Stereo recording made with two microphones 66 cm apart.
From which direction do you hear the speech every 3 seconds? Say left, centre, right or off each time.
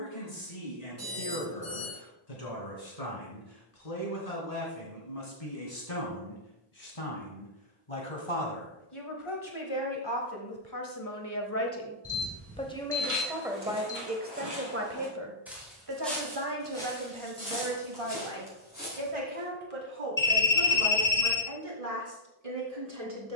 left, left, left, left, centre, right, right, right.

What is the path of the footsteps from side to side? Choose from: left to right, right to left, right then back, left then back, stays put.
right to left.